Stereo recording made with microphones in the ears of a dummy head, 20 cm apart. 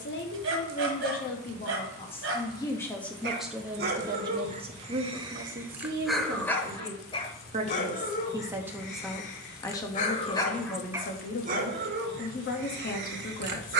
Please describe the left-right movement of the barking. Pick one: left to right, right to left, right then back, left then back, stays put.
left then back.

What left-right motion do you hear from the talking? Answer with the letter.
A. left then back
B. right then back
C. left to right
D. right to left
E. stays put
B.